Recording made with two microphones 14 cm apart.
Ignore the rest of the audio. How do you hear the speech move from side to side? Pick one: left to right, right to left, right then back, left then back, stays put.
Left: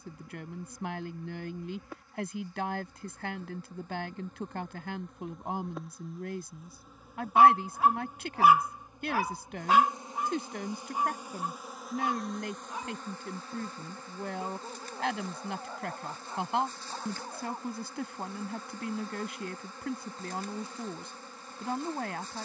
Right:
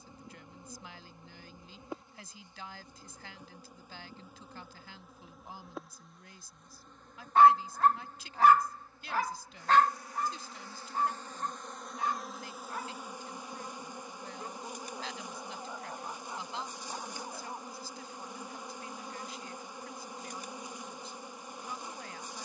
stays put.